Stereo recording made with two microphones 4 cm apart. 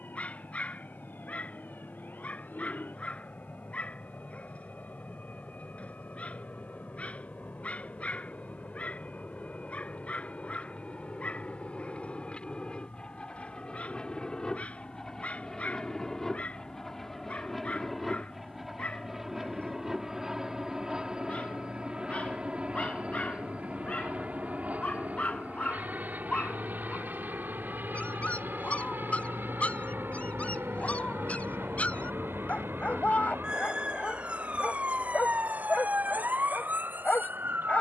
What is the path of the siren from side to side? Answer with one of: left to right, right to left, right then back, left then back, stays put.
left to right.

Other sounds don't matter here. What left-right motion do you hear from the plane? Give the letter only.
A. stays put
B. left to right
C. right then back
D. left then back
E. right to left
B.